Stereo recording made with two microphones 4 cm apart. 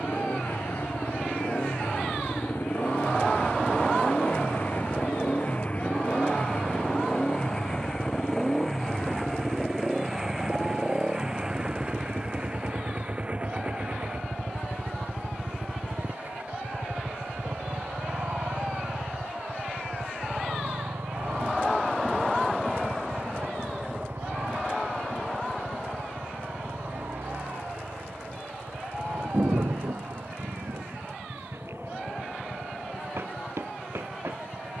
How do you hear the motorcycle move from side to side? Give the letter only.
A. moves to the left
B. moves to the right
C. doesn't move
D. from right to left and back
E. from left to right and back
B.